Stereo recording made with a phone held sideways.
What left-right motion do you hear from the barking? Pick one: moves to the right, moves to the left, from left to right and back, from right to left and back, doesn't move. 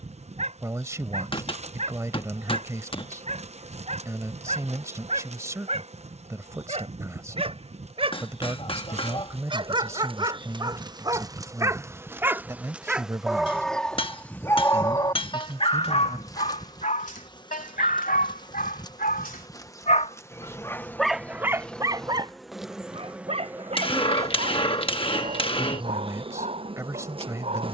from right to left and back.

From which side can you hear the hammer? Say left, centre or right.
left.